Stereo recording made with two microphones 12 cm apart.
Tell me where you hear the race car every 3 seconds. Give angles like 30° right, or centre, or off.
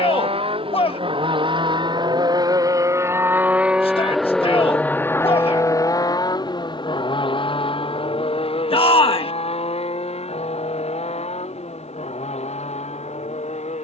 50° right, 10° left, 50° left, 60° left, 70° left.